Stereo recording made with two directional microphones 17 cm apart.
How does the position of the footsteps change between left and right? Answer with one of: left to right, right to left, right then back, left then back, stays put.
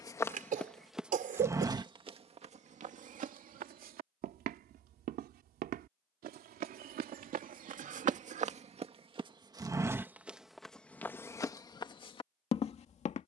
right then back.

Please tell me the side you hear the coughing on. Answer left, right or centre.
right.